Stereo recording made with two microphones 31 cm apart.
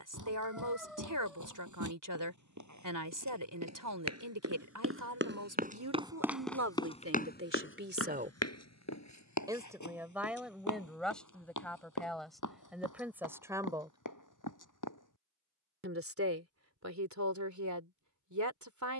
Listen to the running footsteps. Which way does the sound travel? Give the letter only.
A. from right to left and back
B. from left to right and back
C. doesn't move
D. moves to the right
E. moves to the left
E.